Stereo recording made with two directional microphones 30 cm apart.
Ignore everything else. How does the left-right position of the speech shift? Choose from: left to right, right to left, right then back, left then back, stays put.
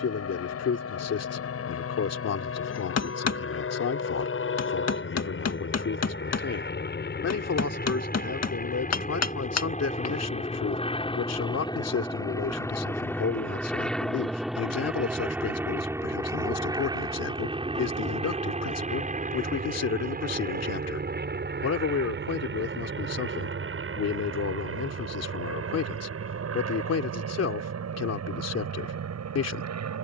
stays put.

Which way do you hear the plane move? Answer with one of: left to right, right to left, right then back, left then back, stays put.
left to right.